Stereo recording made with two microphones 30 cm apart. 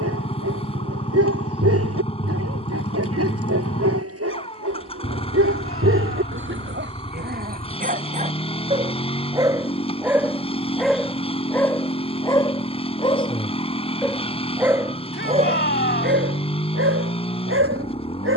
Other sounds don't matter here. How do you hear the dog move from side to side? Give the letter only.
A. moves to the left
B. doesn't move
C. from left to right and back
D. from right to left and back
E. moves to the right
D.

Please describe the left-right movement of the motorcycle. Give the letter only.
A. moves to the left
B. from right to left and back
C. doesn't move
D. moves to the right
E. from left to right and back
C.